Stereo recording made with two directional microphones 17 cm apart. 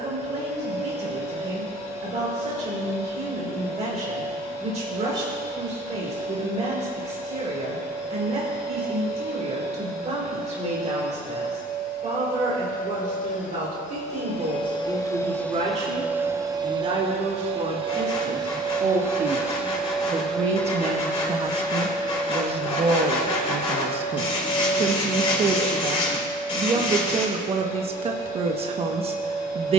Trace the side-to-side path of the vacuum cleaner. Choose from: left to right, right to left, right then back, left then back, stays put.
right then back.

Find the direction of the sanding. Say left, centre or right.
left.